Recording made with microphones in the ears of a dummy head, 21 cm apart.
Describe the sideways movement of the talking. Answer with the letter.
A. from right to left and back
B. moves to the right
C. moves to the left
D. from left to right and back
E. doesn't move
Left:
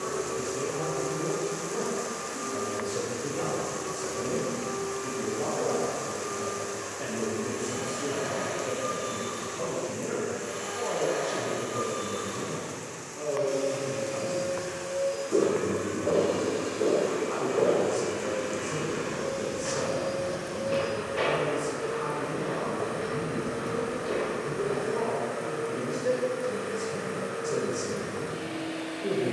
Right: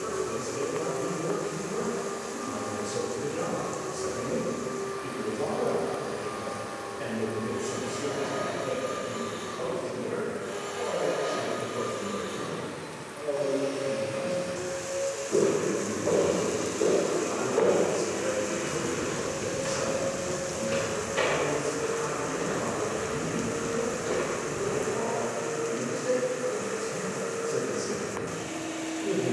C.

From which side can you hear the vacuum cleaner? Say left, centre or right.
left.